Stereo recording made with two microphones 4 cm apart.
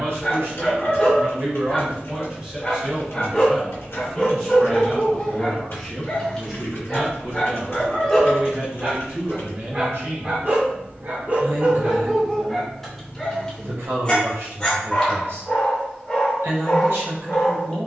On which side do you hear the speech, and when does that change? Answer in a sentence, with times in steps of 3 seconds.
You can hear the speech on the right from 0 s, in the centre from 3 s and on the right from 6 s.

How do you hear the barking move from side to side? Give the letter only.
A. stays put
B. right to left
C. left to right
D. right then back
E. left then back
D.